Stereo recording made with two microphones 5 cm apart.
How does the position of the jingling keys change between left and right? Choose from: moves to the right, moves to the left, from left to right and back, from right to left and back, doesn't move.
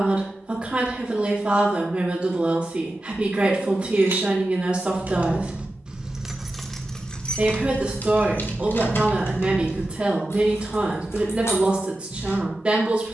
moves to the left.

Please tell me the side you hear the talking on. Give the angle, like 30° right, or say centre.
20° right.